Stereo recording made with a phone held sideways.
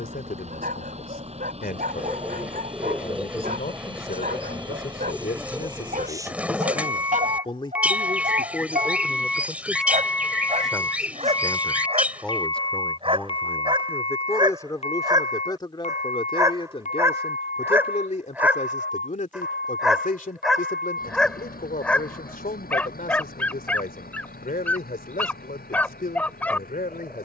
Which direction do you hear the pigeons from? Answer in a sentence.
In this clip you hear the pigeons in the centre.